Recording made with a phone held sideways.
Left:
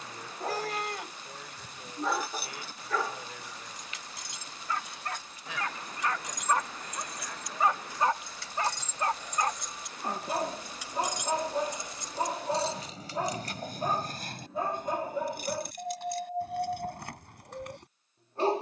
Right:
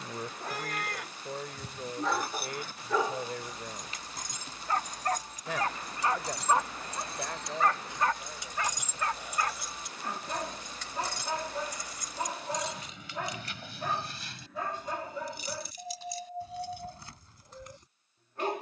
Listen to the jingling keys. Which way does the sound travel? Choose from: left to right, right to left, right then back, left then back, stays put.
right to left.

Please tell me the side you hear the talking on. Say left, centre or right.
right.